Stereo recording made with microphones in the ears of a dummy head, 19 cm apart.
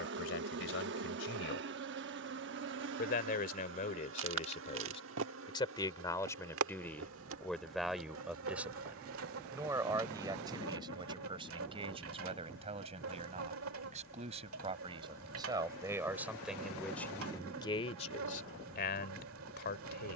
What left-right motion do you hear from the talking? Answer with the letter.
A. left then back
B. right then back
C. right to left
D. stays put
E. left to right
B.